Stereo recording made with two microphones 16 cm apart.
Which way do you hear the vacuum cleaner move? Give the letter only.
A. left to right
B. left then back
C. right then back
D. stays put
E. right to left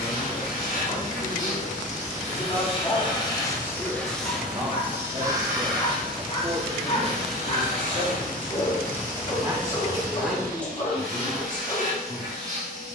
A.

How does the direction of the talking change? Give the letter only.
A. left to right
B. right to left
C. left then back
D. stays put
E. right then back
E.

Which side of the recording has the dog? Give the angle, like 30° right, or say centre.
40° left.